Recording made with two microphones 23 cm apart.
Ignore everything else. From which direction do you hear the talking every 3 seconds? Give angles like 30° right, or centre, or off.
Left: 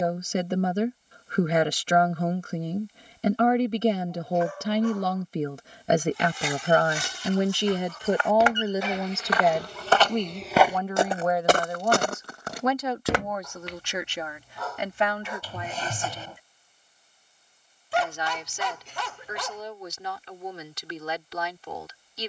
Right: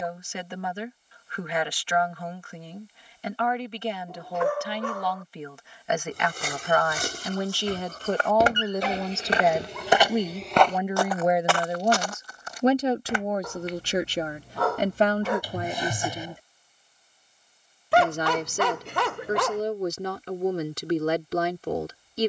40° left, 40° left, 20° left, 10° right, 30° right, 40° right, 50° right, 50° right.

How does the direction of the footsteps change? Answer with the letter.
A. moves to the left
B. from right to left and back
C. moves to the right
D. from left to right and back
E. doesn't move
A.